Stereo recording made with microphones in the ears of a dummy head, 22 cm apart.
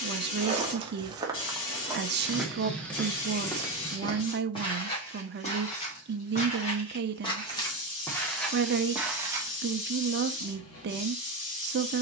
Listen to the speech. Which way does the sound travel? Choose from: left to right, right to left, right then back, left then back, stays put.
stays put.